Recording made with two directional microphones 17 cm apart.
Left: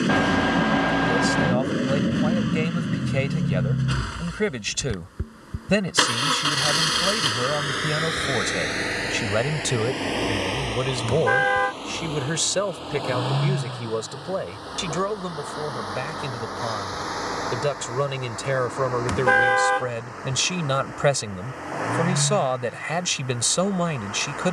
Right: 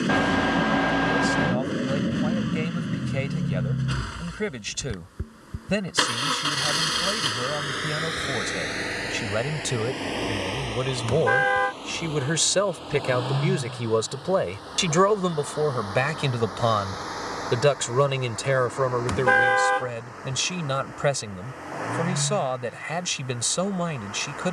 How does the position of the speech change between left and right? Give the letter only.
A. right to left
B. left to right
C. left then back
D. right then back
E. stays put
D.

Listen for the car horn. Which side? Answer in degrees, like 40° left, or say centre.
centre.